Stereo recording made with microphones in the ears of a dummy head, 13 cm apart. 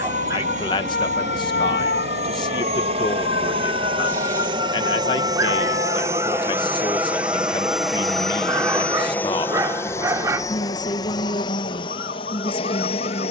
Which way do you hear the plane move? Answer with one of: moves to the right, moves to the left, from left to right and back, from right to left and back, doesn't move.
moves to the left.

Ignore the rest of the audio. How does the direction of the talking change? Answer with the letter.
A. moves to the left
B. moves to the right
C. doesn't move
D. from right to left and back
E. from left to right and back
C.